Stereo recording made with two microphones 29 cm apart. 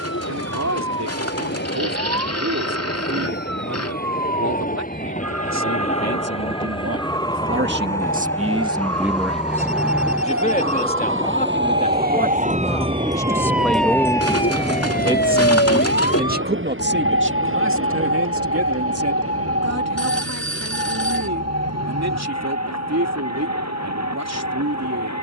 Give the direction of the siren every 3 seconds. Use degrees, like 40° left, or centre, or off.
80° right, 70° right, 70° right, 50° right, centre, 50° left, 70° left, 80° left, 80° left.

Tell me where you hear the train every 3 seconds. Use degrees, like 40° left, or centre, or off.
40° left, 30° left, 10° left, 10° right, 30° right, 40° right, 50° right, 60° right, 70° right.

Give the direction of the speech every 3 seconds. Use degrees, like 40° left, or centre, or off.
70° right, 70° right, 40° right, 20° left, 10° left, 40° right, 60° right, 70° right, 70° right.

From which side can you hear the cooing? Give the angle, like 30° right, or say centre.
60° left.